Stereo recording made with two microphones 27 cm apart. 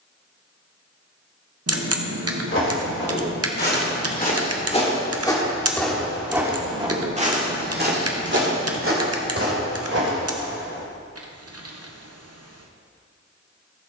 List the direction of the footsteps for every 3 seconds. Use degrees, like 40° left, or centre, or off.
50° left, 20° left, 30° right, 60° right, off.